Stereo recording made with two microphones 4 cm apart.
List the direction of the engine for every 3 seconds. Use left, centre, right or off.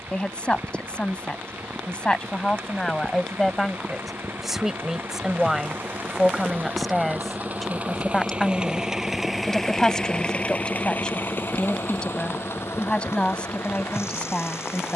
right, right, right, left, left.